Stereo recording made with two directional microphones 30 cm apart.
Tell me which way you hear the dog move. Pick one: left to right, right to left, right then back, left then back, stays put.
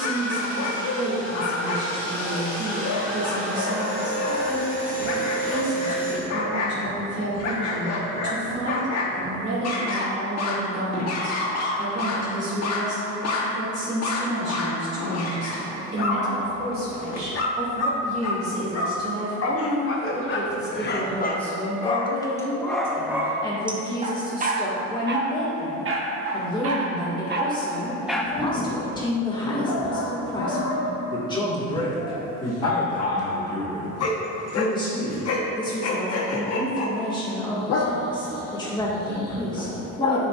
right then back.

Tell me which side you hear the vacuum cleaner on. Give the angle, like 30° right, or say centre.
50° right.